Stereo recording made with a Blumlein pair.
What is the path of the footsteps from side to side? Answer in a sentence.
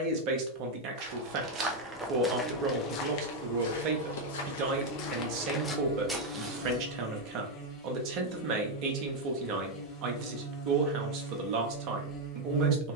In this clip you hear the footsteps move from right to left and back again.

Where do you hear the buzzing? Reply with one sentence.
You can hear the buzzing on the left.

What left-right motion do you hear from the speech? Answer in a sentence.
In this clip you hear the speech stay in one place.